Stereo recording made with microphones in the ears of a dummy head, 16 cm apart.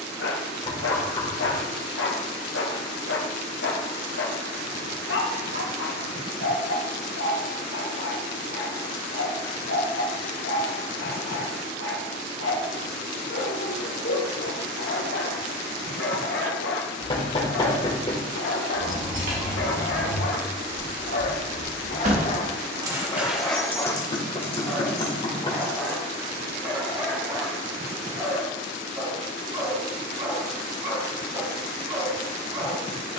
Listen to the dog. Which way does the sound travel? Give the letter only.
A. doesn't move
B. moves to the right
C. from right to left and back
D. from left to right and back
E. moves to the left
B.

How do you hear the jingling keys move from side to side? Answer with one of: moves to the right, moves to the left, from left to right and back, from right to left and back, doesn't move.
moves to the left.